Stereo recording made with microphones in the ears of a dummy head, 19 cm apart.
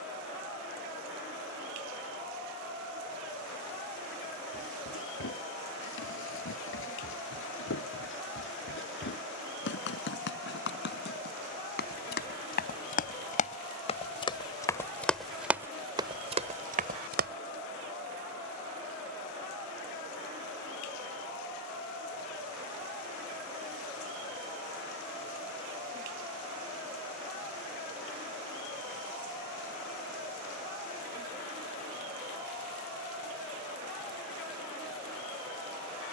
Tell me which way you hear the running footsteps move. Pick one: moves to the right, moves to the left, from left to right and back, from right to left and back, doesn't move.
moves to the right.